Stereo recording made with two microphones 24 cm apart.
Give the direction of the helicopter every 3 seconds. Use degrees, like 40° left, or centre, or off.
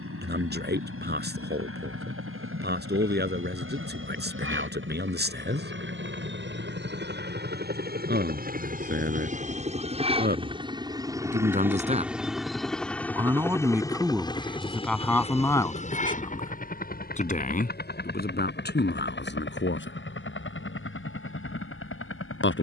70° right, 60° right, 50° right, 20° right, 10° left, 30° left, 50° left, 50° left.